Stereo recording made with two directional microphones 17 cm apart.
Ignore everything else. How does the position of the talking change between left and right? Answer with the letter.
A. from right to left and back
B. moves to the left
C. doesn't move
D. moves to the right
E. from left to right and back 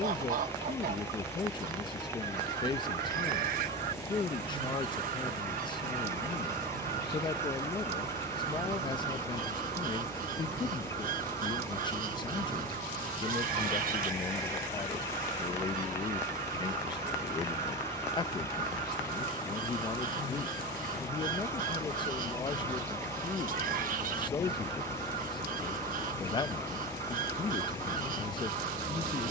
C.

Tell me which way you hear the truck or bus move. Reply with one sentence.
In this clip you hear the truck or bus stay in one place.